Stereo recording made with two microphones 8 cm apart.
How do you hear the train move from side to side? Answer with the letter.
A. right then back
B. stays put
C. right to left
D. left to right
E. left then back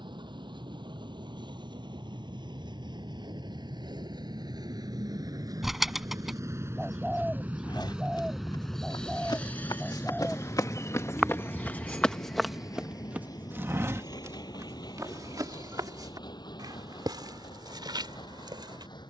C.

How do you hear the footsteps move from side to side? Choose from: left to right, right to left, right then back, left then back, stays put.
left to right.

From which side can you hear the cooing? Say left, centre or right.
centre.